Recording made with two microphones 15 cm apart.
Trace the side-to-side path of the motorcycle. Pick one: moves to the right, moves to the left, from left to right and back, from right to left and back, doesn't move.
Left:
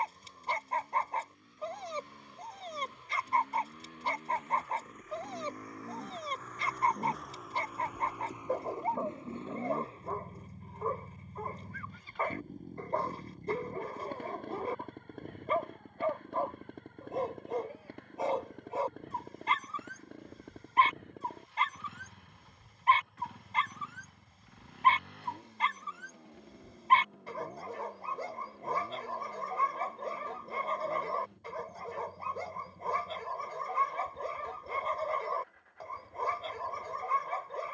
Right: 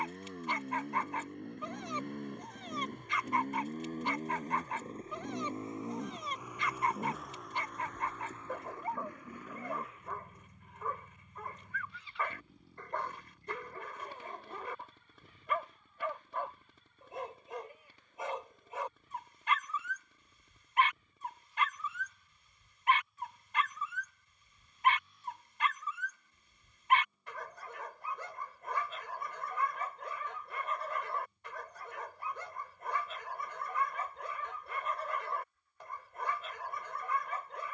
moves to the left.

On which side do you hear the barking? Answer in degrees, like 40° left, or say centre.
40° left.